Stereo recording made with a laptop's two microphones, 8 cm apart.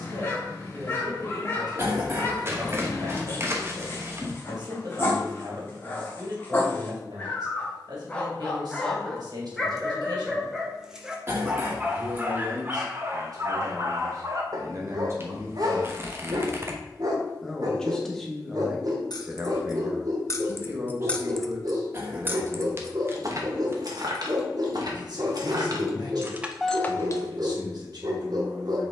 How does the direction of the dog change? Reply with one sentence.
You can hear the dog go from the left side to the right.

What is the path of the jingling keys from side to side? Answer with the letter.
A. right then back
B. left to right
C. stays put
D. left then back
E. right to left
A.